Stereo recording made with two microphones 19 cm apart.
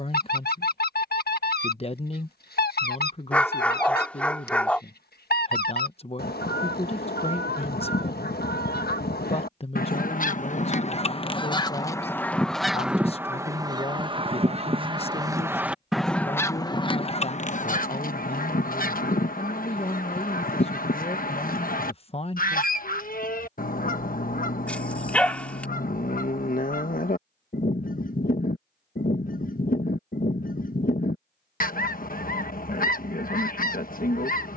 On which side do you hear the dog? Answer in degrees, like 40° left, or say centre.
10° left.